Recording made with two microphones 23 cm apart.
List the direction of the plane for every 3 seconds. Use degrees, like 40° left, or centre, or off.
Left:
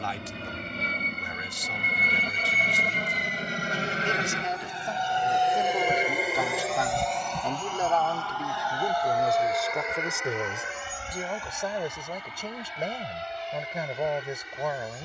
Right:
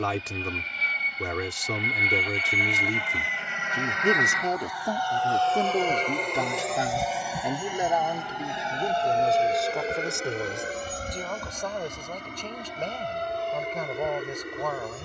60° left, 30° left, 10° right, 30° right, 50° right.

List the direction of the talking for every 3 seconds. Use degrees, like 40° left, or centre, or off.
70° right, 50° right, 20° right, centre, 10° left.